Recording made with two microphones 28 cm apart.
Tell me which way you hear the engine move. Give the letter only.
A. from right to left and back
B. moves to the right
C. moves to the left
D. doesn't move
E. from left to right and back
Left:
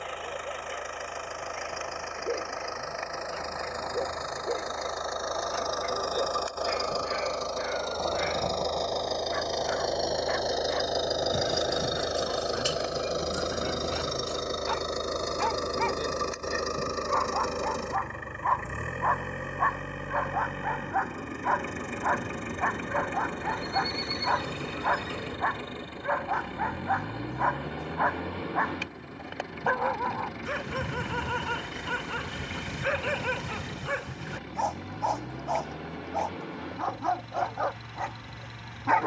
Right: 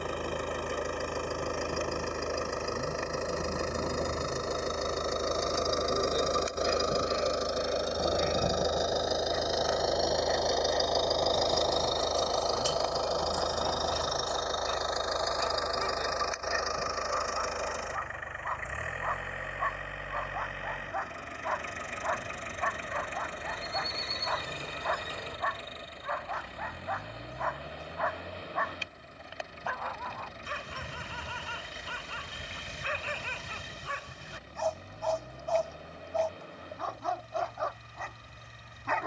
C.